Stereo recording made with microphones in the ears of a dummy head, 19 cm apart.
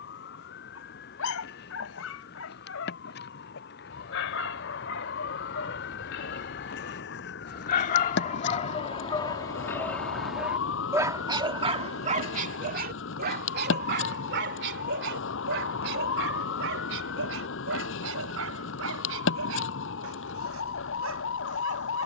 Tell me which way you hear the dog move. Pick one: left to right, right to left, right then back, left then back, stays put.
left to right.